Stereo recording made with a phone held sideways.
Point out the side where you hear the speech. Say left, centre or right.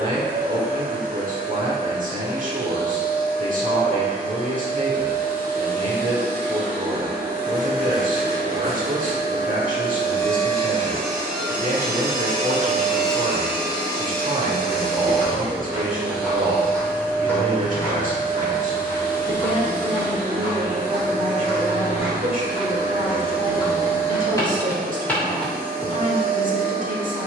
right.